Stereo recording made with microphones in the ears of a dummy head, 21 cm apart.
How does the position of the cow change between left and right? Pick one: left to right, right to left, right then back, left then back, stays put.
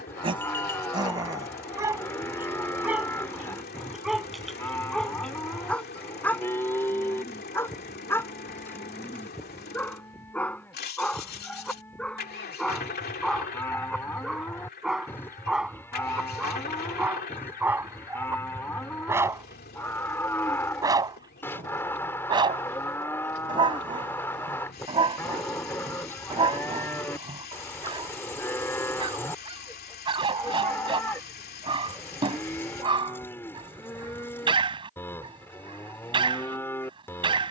stays put.